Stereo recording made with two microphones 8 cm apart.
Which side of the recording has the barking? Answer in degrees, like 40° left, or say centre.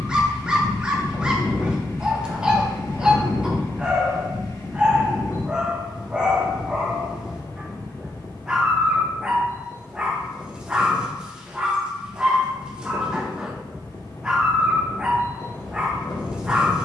10° right.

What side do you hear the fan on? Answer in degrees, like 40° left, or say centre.
50° left.